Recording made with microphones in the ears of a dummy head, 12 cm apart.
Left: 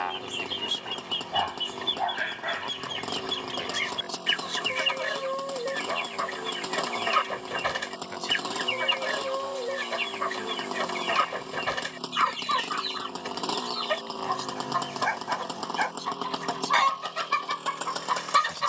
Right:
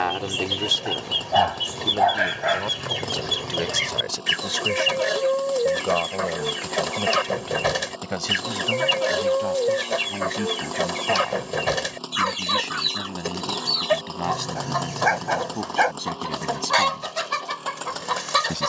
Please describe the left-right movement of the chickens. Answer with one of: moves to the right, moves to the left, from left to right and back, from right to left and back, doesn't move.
doesn't move.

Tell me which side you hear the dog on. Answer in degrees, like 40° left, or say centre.
70° right.